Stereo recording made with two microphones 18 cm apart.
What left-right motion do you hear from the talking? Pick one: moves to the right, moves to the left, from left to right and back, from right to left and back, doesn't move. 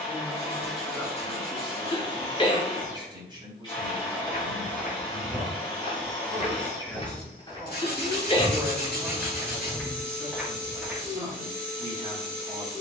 from right to left and back.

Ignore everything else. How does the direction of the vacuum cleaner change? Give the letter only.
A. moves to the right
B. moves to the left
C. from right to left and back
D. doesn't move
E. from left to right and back
D.